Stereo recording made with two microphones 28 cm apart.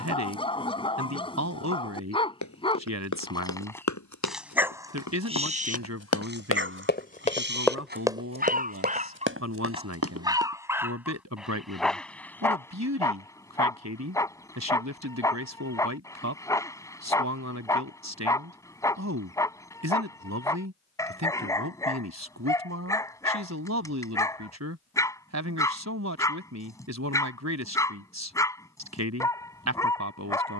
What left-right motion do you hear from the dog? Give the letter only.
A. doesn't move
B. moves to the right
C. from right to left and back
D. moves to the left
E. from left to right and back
E.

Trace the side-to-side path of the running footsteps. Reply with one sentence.
In this clip you hear the running footsteps move from left to right.